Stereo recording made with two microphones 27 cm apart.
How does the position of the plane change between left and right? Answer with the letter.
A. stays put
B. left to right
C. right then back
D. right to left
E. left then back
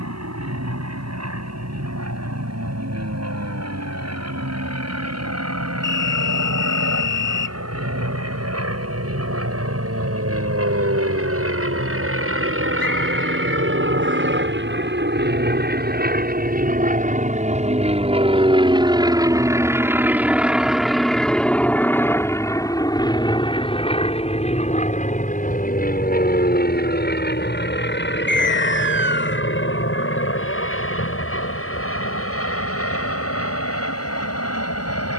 D.